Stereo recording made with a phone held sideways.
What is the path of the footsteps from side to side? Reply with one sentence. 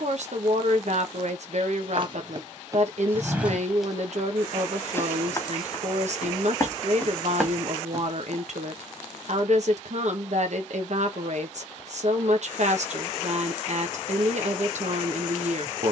You can hear the footsteps move from right to left and back again.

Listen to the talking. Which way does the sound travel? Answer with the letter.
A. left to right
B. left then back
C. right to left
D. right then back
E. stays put
E.